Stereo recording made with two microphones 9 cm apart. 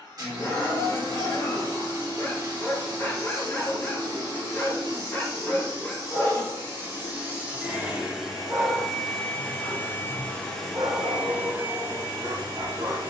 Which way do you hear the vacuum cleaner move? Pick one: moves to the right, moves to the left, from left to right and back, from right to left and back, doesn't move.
from right to left and back.